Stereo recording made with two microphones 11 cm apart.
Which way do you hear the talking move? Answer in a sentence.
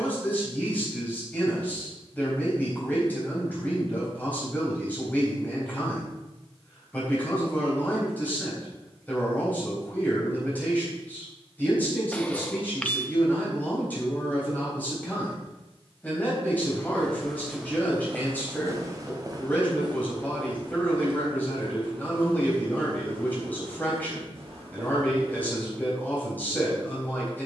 In this clip you hear the talking stay in one place.